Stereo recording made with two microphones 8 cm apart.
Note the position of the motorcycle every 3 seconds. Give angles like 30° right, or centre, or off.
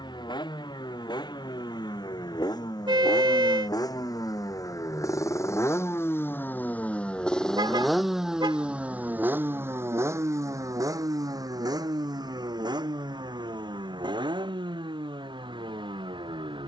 60° left, 50° left, 10° left, 40° right, 60° right, 70° right.